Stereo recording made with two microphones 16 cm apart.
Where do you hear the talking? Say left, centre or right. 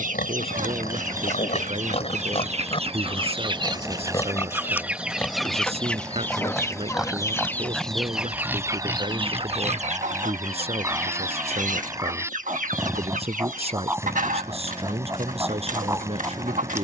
right.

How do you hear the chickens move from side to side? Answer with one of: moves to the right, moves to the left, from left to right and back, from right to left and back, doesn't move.
from right to left and back.